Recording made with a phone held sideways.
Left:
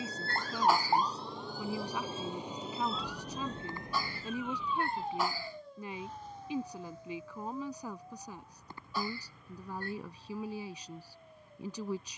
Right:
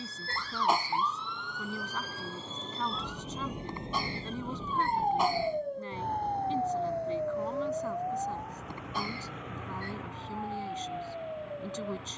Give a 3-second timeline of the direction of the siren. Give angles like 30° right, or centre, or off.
30° left, 30° right, 70° right, 80° right.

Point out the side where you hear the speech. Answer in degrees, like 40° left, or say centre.
10° left.